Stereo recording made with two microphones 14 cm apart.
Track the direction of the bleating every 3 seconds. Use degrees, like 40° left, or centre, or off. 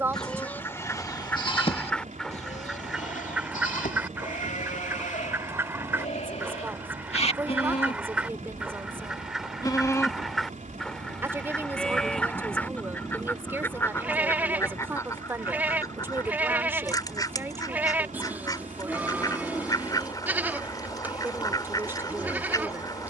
30° left, 70° left, 50° left, 20° left, 10° right, 10° right, 10° right, 10° right.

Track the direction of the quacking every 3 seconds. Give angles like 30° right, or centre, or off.
10° left, 20° right, 10° right, centre, 20° left, 30° left, 30° left, 30° left.